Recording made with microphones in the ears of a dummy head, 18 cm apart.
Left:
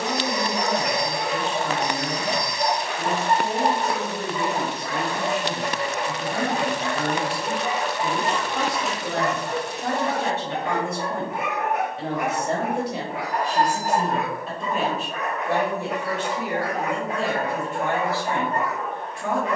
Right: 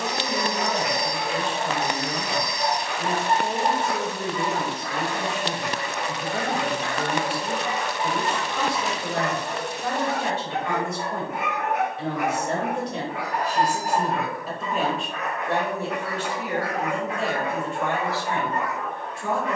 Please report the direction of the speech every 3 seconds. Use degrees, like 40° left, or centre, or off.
50° left, 50° left, 50° left, 50° left, centre, 20° left, 40° left.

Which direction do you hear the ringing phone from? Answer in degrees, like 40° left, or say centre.
centre.